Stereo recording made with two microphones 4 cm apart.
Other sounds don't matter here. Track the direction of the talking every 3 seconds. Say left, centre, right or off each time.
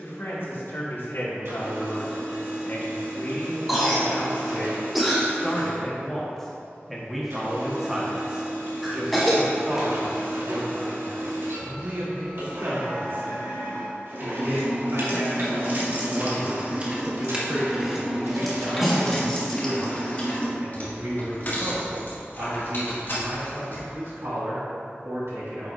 left, left, centre, right, right, right, right, right, right.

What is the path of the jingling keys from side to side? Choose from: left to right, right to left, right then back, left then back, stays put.
right to left.